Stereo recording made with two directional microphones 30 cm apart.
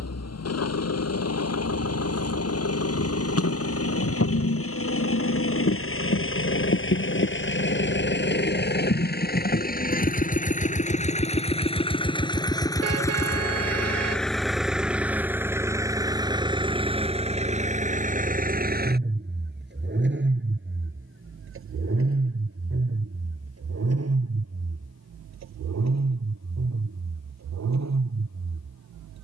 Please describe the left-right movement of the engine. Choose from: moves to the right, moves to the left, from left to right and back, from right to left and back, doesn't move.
moves to the right.